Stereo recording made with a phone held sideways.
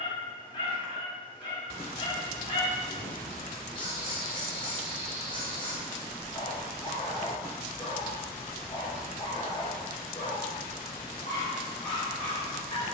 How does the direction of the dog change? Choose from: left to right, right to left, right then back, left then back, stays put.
stays put.